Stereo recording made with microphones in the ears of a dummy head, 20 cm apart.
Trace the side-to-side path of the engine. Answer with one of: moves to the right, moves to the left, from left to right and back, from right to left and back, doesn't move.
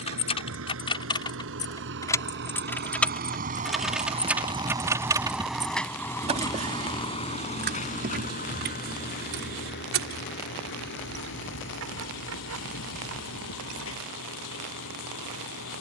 moves to the left.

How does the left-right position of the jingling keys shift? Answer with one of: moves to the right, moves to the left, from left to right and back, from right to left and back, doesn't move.
moves to the right.